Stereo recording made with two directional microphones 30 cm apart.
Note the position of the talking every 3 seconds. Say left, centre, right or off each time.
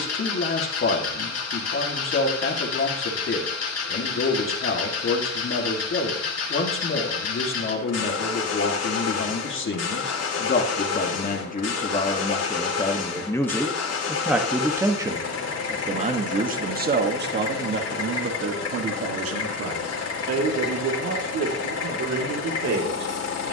left, left, left, left, centre, right, right, right.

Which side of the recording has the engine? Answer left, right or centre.
left.